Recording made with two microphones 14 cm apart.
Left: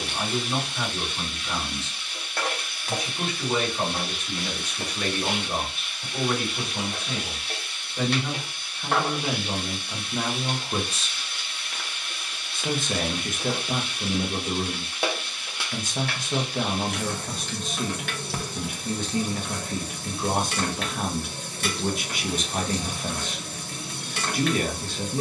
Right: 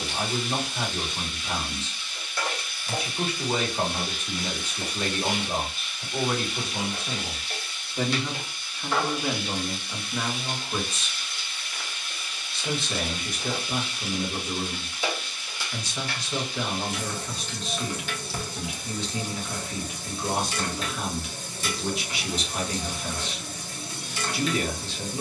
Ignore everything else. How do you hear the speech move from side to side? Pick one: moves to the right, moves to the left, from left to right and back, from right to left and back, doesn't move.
moves to the left.